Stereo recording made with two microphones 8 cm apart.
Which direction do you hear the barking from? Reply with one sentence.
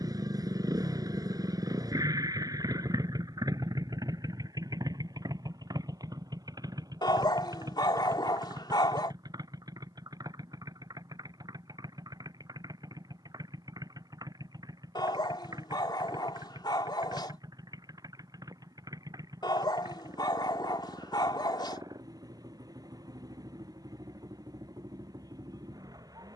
In this clip you hear the barking on the left.